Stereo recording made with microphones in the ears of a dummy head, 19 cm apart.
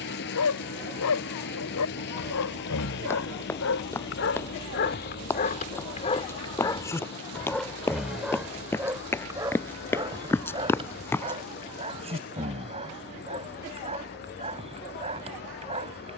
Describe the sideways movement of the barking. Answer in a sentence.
You can hear the barking go from the left side to the right.